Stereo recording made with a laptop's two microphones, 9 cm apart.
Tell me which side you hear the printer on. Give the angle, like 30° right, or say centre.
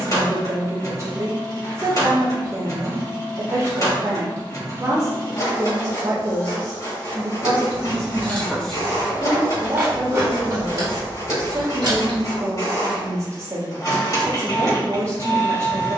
40° left.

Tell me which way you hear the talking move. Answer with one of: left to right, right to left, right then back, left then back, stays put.
stays put.